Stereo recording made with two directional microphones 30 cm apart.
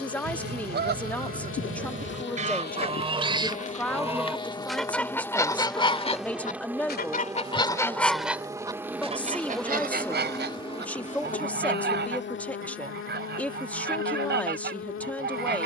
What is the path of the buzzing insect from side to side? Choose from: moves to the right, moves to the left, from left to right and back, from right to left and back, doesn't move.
from left to right and back.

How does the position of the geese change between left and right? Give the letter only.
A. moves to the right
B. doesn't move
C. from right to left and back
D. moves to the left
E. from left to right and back
C.